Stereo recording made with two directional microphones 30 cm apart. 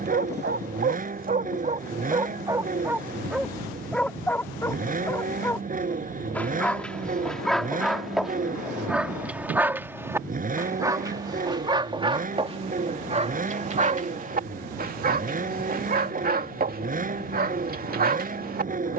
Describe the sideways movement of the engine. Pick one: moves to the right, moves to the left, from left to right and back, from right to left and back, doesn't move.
doesn't move.